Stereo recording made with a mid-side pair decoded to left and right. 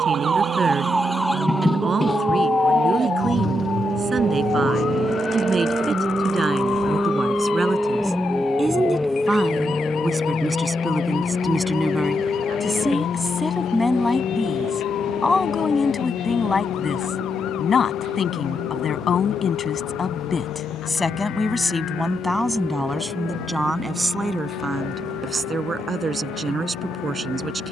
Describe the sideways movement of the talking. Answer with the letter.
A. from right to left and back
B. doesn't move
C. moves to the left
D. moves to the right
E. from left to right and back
A.